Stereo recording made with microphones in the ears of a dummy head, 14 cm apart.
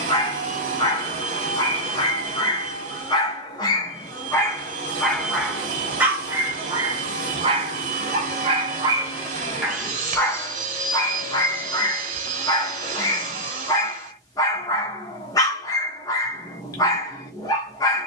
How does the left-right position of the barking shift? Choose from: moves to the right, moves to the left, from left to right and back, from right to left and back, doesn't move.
from left to right and back.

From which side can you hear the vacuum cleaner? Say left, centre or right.
right.